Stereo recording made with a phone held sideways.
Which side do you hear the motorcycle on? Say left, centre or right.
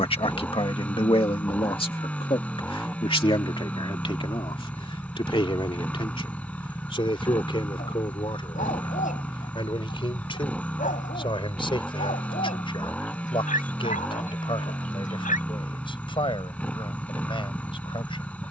centre.